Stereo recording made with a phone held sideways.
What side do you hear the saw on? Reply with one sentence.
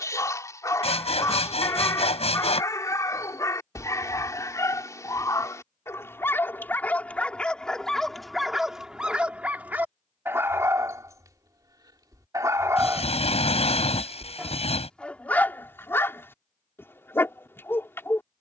You can hear the saw on the left.